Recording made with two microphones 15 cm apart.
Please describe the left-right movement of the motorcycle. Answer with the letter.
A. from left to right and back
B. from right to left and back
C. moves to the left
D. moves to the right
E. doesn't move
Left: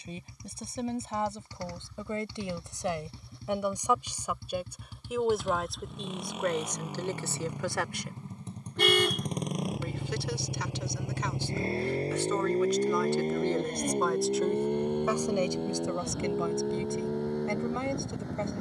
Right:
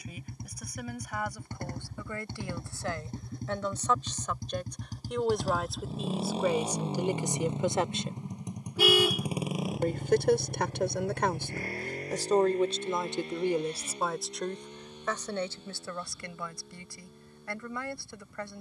C.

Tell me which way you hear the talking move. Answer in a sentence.
You can hear the talking go right and come back.